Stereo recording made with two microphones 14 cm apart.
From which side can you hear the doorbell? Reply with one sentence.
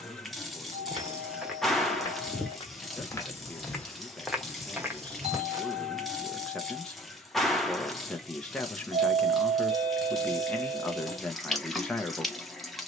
In this clip you hear the doorbell on the right.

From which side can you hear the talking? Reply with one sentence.
You can hear the talking in the centre.